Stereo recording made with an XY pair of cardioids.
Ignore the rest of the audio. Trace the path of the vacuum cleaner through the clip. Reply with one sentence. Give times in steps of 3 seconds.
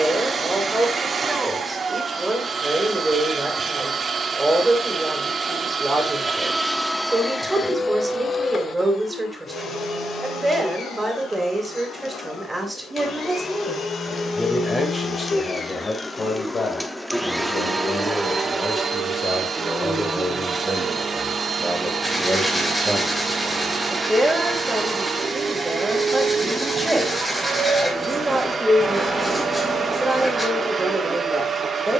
You can hear the vacuum cleaner on the right from 0 s, in the centre from 6 s, on the left from 9 s, in the centre from 15 s and on the right from 18 s.